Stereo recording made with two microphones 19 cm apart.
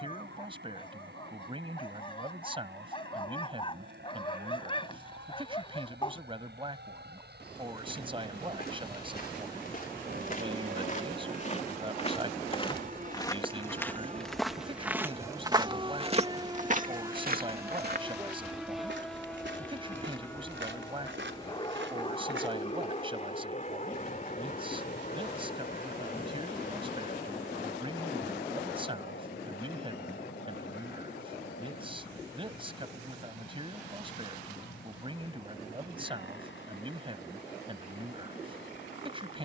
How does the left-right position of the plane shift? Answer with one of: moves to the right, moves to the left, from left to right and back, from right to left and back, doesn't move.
moves to the left.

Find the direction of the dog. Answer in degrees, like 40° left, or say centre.
30° left.